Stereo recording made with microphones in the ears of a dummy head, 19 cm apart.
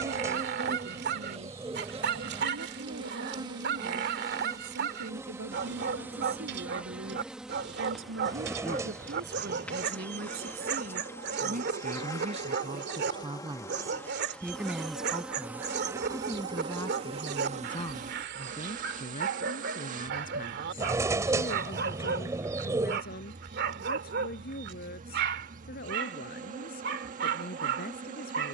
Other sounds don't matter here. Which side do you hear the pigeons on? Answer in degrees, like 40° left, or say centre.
10° right.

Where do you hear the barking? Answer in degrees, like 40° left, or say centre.
50° right.